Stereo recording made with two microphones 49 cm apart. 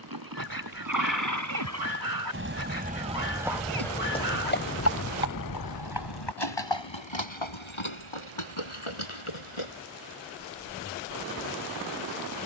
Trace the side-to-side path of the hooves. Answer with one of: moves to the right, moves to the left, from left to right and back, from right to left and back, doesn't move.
moves to the left.